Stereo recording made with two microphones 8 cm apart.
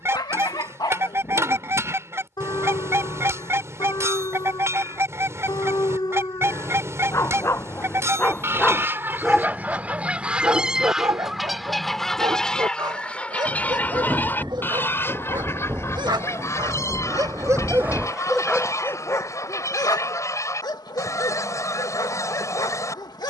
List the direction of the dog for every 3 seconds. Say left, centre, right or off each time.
left, left, left, right, right, right, left, left.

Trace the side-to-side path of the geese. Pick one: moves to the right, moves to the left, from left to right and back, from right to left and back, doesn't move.
moves to the left.